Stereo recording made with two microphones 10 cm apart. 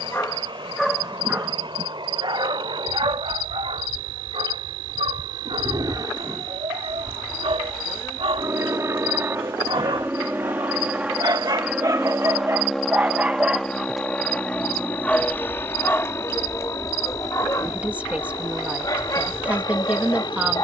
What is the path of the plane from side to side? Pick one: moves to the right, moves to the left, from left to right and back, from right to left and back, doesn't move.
moves to the left.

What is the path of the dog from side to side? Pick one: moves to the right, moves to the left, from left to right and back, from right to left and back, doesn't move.
from left to right and back.